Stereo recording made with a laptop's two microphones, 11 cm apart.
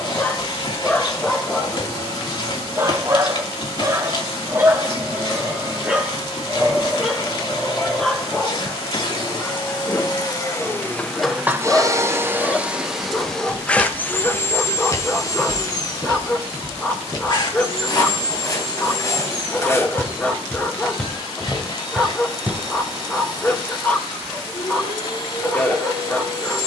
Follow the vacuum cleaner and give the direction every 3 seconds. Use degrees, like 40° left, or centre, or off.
50° left, 50° left, 50° left, 20° left, 10° left, 40° left, 50° left, 50° left, 50° left.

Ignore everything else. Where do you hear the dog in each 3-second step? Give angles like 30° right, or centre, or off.
centre, 20° right, centre, 10° left, 10° left, 10° left, 10° left, 10° left, 10° left.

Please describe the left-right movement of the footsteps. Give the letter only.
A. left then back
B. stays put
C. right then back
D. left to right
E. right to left
A.